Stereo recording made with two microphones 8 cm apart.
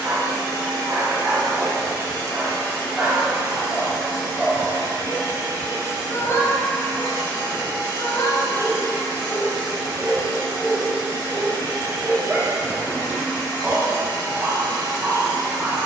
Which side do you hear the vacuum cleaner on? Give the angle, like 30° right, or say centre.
60° right.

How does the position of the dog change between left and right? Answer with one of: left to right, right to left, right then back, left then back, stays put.
left then back.